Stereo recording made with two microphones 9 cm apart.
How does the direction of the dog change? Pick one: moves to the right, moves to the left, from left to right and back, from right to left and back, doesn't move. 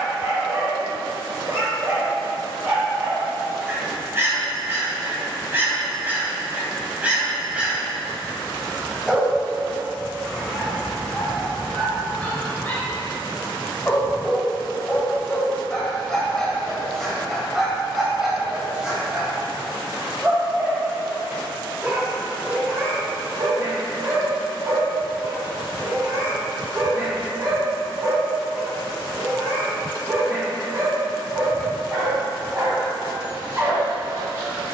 from right to left and back.